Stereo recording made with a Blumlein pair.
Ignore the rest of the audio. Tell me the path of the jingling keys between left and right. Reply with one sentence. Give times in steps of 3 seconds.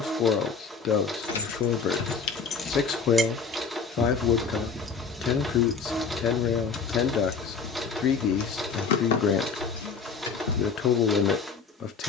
In this clip you hear the jingling keys on the left from 0 s, in the centre from 3 s and on the left from 6 s.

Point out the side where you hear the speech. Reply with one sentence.
You can hear the speech on the left.